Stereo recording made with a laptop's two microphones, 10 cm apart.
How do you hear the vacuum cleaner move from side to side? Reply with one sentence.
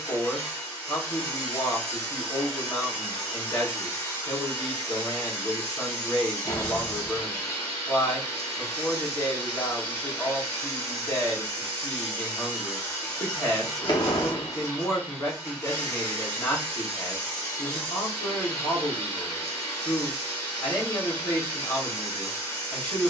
In this clip you hear the vacuum cleaner stay put.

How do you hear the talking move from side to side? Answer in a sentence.
You can hear the talking stay in one place.